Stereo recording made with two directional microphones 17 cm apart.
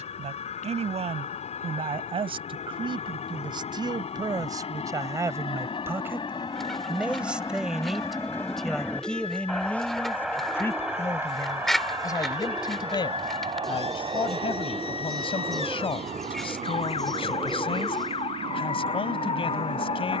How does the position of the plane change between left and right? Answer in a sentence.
You can hear the plane move to the right.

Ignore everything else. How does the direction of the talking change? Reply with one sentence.
You can hear the talking go from the right side to the left.